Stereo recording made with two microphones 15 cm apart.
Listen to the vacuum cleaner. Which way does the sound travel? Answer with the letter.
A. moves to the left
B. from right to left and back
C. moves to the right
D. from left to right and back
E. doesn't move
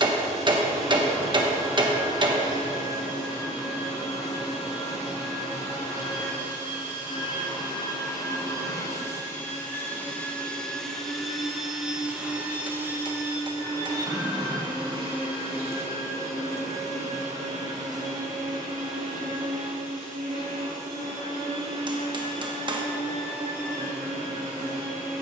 C.